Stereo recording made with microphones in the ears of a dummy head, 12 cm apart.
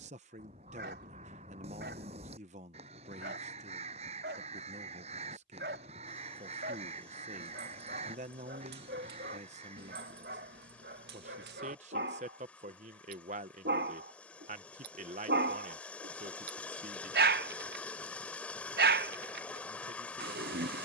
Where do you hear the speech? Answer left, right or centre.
right.